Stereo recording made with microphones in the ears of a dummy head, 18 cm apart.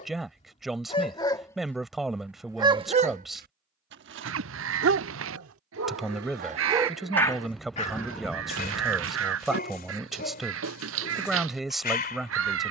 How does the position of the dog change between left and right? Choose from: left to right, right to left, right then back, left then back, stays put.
right then back.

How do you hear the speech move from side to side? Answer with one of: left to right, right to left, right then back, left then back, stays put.
stays put.